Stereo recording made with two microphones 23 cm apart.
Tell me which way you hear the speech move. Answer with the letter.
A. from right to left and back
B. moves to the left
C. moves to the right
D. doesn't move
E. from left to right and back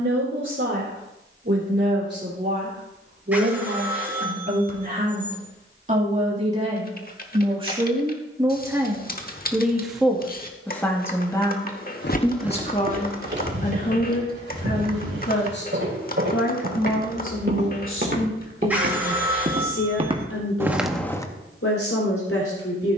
B.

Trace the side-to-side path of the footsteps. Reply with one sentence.
You can hear the footsteps go right and come back.